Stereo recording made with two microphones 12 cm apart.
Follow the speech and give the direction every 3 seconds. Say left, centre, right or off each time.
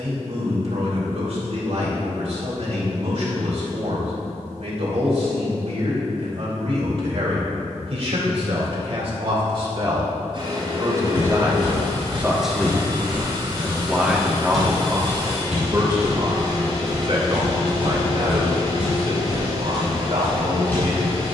right, right, right, right, centre, right, right.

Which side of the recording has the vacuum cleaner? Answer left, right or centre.
right.